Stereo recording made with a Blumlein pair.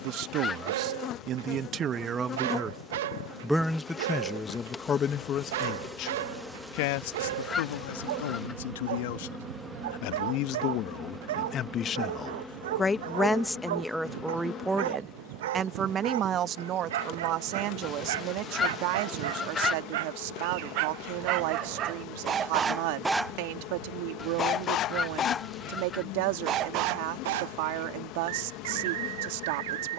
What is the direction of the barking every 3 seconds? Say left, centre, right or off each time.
right, right, right, right, right, right, right, right, centre, right.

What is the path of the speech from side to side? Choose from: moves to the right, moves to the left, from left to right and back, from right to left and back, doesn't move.
from right to left and back.